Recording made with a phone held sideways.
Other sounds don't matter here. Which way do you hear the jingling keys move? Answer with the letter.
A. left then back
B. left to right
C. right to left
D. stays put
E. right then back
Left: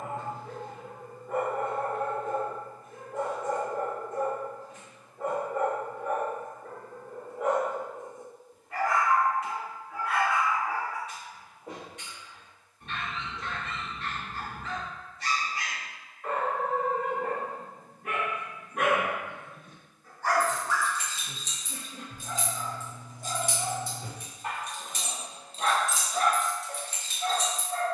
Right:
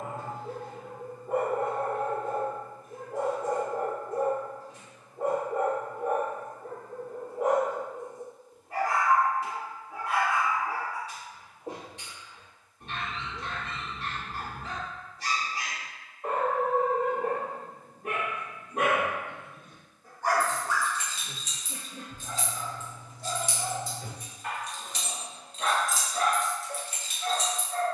A.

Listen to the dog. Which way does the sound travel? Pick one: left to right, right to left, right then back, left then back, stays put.
right to left.